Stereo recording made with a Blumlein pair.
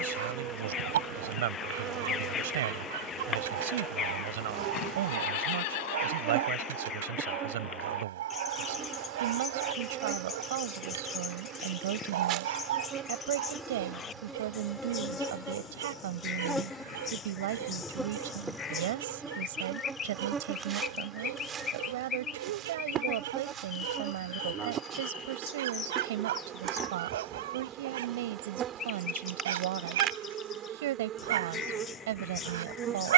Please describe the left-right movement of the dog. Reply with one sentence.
In this clip you hear the dog stay put.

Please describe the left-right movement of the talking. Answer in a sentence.
In this clip you hear the talking stay in one place.